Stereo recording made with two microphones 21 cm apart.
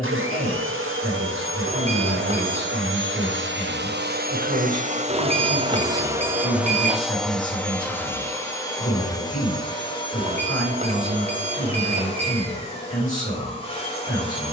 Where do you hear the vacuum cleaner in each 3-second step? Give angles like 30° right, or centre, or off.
80° right, 40° right, centre, 20° left, 30° left.